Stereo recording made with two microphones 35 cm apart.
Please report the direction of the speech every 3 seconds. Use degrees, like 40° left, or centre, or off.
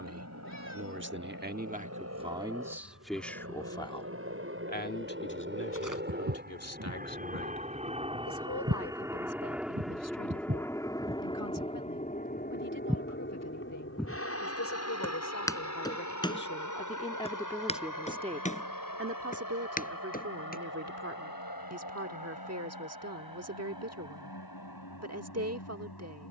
20° right, 20° left, 50° left, 60° left, 60° left, 30° left, 40° right, 50° right, 50° right.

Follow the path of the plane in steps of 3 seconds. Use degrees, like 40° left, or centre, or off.
50° right, 40° right, 20° right, 10° left, 30° left, 50° left, 60° left, 70° left, 70° left.